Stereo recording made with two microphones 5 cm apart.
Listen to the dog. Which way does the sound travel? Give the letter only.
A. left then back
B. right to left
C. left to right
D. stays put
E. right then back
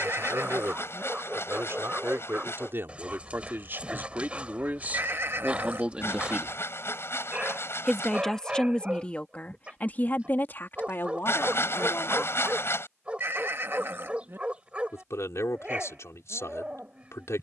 D.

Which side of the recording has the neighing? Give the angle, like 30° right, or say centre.
50° right.